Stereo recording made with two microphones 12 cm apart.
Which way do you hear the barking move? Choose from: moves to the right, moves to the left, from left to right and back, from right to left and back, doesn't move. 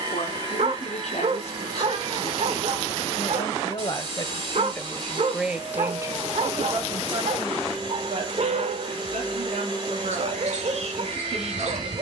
doesn't move.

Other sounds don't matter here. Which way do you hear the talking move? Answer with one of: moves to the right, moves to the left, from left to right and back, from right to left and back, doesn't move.
moves to the right.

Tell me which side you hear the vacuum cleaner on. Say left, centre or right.
right.